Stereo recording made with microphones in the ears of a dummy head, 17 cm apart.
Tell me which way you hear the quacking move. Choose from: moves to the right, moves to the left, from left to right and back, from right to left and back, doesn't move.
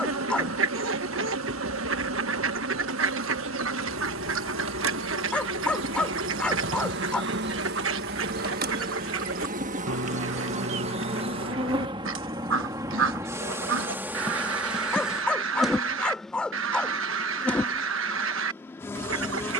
doesn't move.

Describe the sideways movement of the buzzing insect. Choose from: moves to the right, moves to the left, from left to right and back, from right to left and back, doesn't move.
moves to the left.